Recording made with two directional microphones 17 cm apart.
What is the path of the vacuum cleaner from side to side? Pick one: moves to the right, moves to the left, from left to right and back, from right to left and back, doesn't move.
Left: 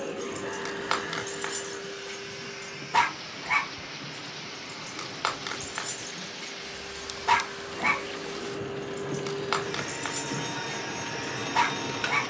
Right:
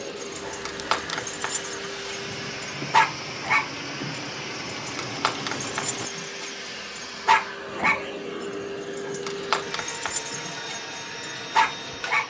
from left to right and back.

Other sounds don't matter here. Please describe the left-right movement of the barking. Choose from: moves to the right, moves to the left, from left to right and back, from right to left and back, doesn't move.
doesn't move.